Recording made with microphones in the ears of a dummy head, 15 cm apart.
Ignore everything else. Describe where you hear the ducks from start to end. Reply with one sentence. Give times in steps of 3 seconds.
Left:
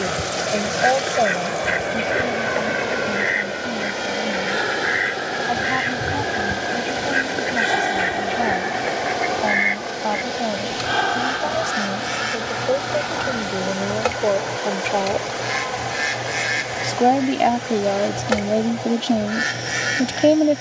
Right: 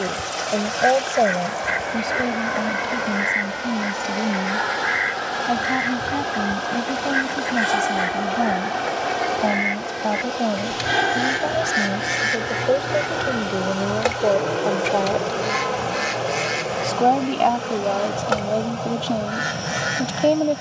In this clip you hear the ducks on the left from 0 s, in the centre from 9 s and on the left from 18 s.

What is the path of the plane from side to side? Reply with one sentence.
In this clip you hear the plane travel towards the right.